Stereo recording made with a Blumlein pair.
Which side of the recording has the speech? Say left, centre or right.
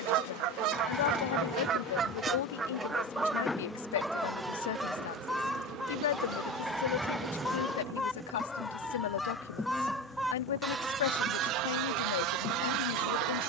left.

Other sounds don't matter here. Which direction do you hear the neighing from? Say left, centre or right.
centre.